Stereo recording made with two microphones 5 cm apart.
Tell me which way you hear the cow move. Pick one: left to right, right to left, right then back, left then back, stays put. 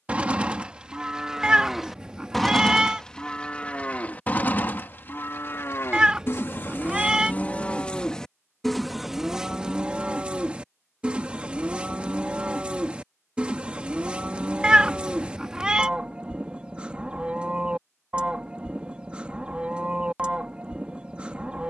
left then back.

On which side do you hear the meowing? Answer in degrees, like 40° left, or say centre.
20° right.